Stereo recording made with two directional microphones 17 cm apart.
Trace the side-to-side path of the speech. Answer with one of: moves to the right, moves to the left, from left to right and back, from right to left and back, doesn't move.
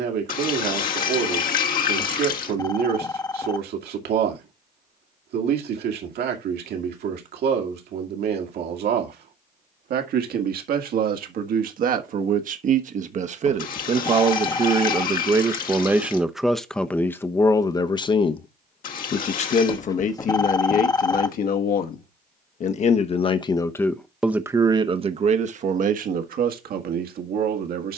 from right to left and back.